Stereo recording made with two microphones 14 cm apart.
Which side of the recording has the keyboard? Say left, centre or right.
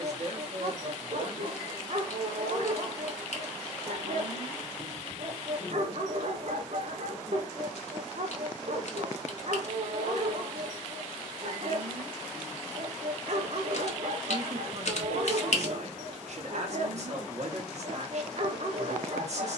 left.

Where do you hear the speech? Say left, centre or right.
right.